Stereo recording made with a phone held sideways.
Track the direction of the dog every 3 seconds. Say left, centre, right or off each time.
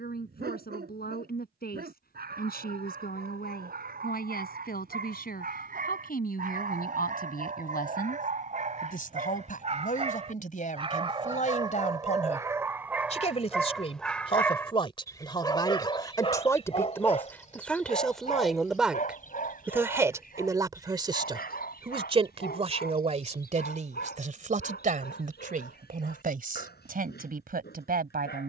right, right, right, right, centre, left, left, left, left, left.